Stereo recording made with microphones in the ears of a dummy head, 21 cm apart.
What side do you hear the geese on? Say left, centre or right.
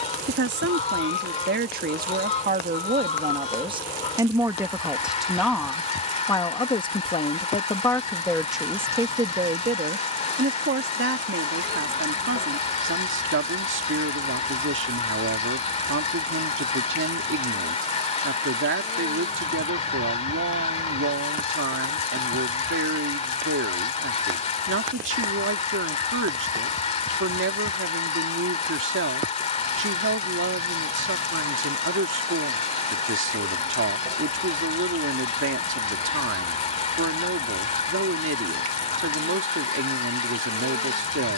left.